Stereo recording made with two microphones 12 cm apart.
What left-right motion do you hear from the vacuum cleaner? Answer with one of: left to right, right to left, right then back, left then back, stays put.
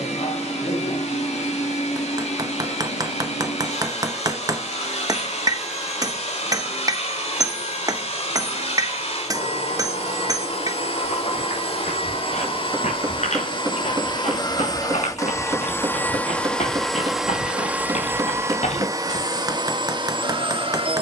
left to right.